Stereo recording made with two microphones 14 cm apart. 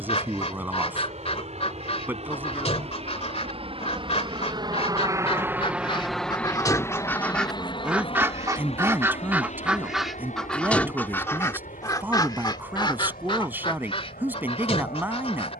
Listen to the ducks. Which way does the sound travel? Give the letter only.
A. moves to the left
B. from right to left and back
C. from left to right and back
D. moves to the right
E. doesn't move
C.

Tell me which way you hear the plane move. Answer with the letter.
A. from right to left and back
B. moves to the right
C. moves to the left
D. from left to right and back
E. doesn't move
C.